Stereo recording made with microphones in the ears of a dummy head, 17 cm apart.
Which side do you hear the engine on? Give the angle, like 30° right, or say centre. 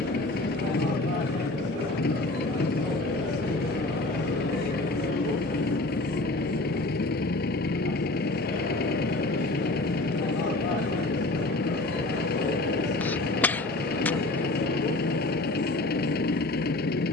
50° left.